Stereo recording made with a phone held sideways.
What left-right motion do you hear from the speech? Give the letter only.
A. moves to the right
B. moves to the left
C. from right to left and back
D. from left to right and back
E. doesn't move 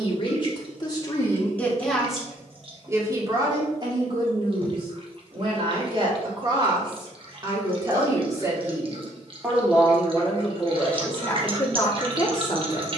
D.